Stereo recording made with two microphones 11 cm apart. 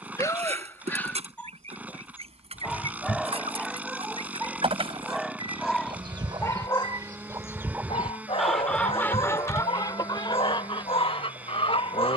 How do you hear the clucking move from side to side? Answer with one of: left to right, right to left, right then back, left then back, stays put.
right to left.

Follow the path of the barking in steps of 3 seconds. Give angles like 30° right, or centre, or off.
10° left, centre, 50° left, 60° left.